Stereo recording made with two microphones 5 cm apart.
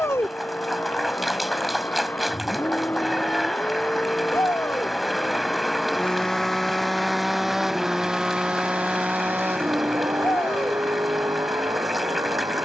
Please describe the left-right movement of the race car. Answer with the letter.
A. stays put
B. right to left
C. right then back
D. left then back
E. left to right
E.